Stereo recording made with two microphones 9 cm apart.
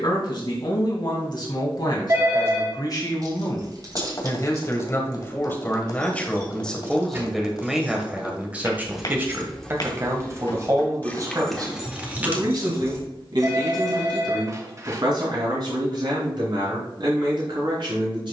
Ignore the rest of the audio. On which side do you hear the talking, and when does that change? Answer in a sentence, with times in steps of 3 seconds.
In this clip you hear the talking on the left from 0 s, in the centre from 6 s and on the right from 9 s.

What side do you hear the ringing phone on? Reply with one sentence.
In this clip you hear the ringing phone on the right.